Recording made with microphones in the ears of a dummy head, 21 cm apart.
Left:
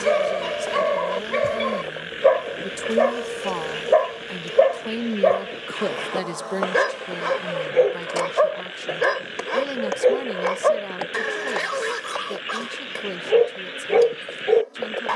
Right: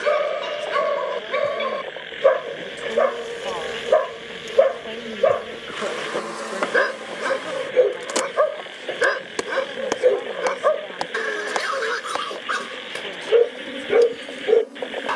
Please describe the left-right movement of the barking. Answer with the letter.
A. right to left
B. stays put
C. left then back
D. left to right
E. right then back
B.